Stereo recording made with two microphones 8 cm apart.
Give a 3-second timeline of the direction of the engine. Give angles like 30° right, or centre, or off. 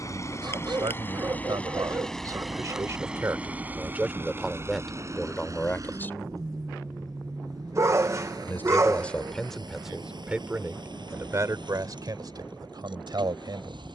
20° left, 30° right, 50° right, 60° right, 70° right.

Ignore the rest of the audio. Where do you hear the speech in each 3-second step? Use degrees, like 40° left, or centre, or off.
60° right, centre, 20° left, 20° right, 60° right.